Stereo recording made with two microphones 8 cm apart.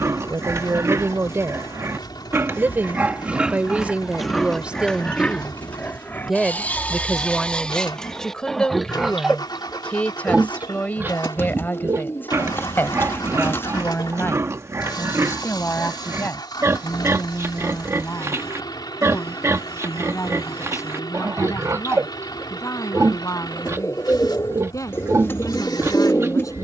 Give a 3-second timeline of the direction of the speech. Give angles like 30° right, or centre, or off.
40° right, 20° right, 10° left, 20° left, 30° left, 40° left, 40° left, 50° left, 50° left.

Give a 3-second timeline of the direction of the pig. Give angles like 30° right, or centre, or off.
40° right, centre, 10° left, 20° right, 40° right, 40° right, 40° right, 40° right, 40° right.